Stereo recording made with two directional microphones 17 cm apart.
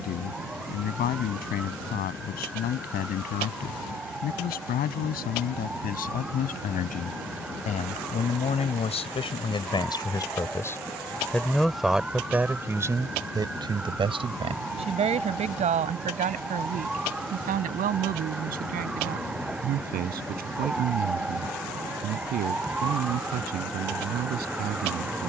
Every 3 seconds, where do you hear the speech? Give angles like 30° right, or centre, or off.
60° left, 60° left, 50° left, 20° left, 20° right, 50° right, 60° right, 60° right, 60° right.